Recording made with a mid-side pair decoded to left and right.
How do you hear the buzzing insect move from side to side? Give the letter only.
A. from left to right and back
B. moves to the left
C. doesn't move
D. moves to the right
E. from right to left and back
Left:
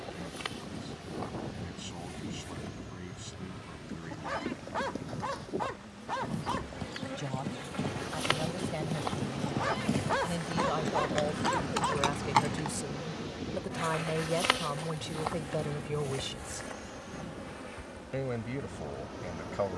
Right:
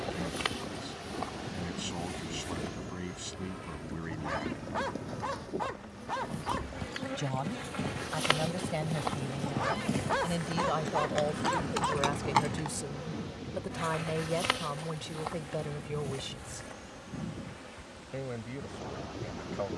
B.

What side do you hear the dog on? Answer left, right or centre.
centre.